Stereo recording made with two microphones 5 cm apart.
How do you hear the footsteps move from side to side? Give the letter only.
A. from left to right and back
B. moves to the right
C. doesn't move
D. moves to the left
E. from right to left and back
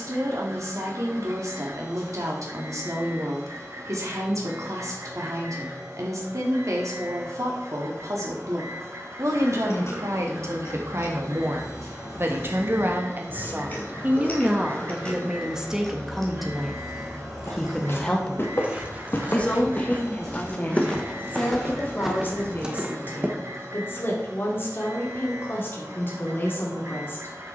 B.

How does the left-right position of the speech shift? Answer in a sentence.
You can hear the speech go from the right side to the left.